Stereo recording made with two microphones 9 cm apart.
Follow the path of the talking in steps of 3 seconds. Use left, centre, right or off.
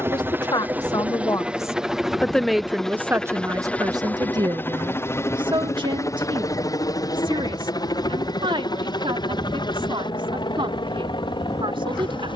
left, right, right, right.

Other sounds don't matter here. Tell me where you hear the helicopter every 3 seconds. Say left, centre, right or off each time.
centre, left, left, left.